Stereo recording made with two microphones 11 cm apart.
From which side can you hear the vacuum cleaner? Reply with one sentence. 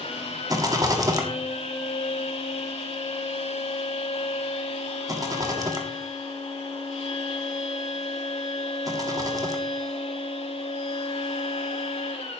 In this clip you hear the vacuum cleaner on the left.